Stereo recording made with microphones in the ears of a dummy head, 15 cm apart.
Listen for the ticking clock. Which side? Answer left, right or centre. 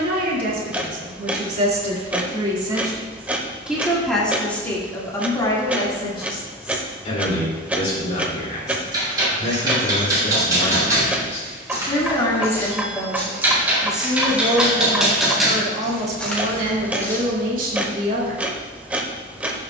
centre.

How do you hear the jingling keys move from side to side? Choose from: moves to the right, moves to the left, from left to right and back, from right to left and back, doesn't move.
moves to the left.